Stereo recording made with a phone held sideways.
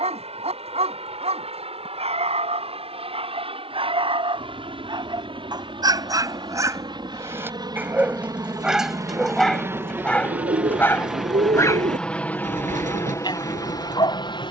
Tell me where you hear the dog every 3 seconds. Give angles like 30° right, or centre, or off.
50° right, 40° right, 20° right, 10° left, 30° left.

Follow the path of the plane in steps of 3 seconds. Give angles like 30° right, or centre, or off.
50° right, 50° right, 30° right, 10° right, 20° left.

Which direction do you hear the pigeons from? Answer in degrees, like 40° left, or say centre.
70° right.